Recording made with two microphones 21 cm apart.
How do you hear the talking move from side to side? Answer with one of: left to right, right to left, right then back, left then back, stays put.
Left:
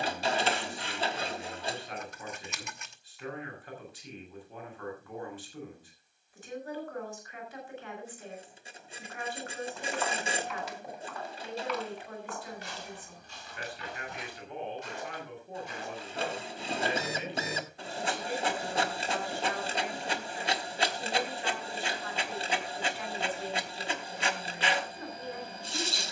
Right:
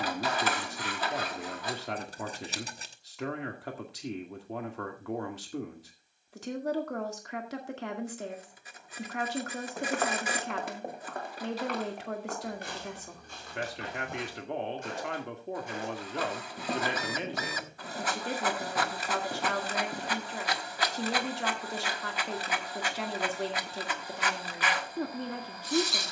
stays put.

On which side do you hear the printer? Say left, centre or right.
left.